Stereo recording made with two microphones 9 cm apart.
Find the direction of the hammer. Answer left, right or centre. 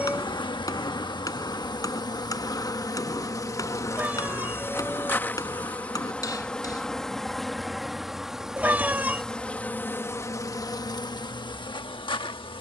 left.